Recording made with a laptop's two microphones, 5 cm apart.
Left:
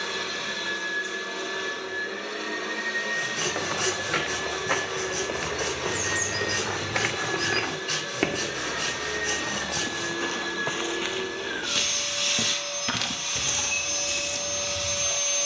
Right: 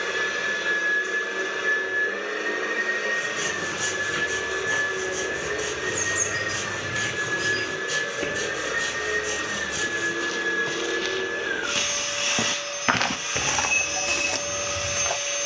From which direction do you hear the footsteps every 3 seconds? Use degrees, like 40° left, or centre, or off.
off, 70° left, 60° left, 20° left, 60° right.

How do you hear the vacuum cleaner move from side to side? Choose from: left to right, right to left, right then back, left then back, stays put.
stays put.